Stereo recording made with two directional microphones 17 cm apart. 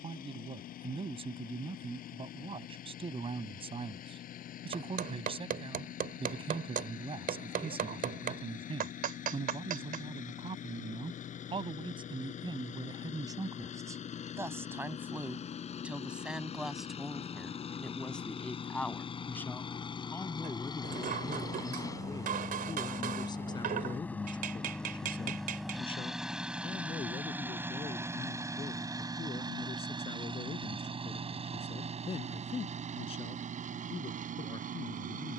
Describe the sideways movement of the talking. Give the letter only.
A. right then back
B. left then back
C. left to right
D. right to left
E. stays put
D.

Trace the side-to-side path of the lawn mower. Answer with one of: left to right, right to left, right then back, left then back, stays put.
left to right.